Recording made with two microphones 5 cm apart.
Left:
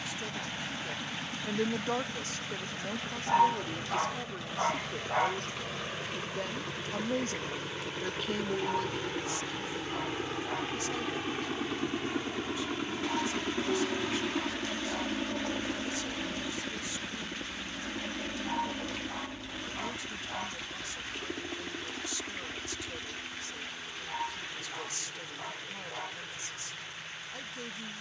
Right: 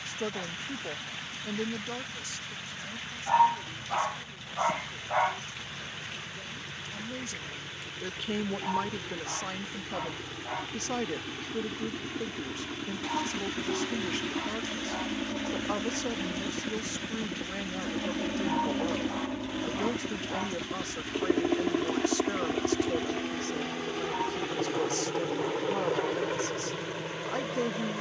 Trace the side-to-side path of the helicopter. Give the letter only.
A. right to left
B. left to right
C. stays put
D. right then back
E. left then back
B.